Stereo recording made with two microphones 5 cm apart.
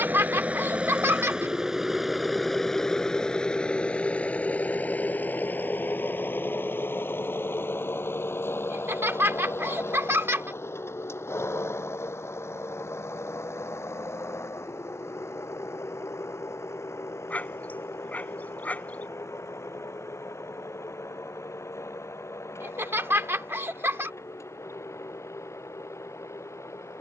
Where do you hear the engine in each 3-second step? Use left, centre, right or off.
centre, left, left, left, left, left, left, left, left.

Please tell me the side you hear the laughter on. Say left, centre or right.
right.